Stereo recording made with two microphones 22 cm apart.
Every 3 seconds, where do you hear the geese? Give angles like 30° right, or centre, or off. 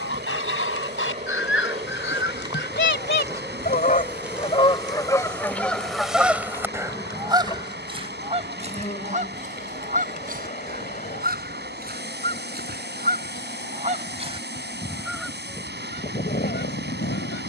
70° left, 20° left, 20° right, 40° right, 30° right, 40° left.